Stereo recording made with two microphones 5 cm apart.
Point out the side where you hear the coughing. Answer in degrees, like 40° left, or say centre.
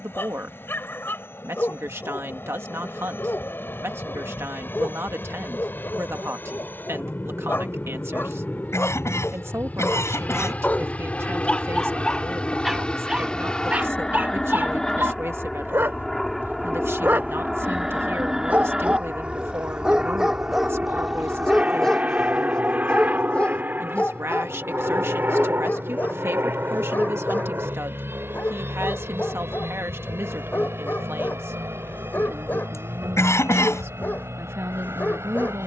80° left.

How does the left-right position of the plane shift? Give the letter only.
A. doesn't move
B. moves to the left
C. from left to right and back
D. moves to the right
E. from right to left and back
D.